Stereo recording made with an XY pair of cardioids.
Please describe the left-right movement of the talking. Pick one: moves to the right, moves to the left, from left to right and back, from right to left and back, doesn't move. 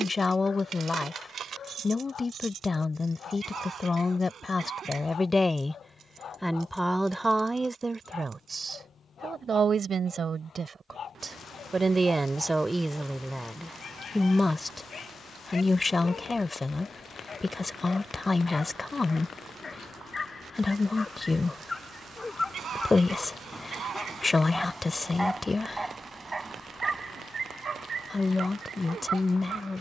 from left to right and back.